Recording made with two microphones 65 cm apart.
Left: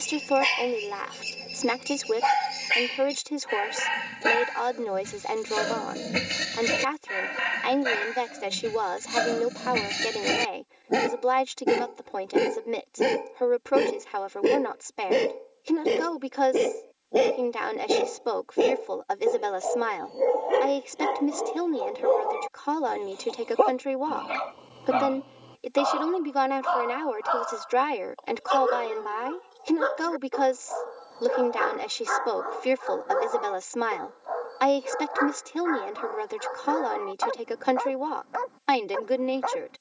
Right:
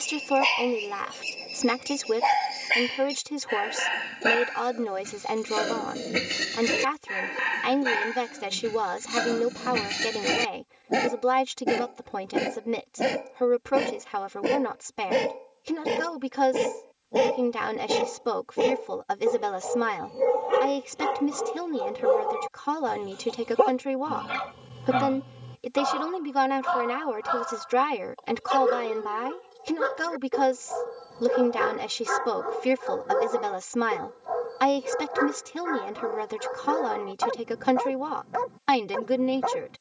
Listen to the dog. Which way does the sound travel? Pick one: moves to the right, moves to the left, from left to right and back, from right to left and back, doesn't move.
moves to the right.